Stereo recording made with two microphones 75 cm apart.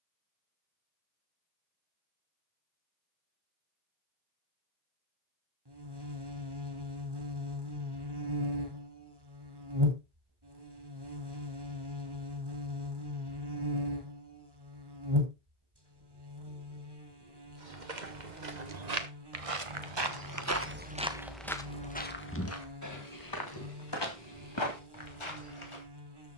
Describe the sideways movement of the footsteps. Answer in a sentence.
You can hear the footsteps move to the left.